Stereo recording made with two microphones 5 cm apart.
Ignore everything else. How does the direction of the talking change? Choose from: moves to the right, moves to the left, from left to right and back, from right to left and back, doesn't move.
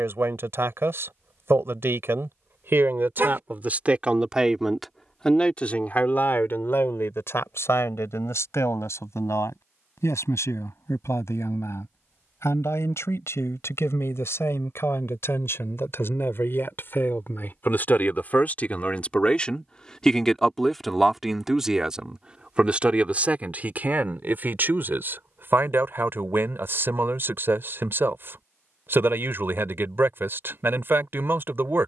from right to left and back.